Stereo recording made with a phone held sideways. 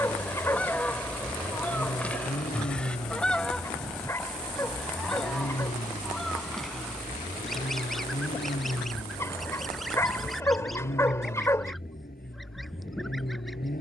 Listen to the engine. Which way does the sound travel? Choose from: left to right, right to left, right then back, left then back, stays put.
stays put.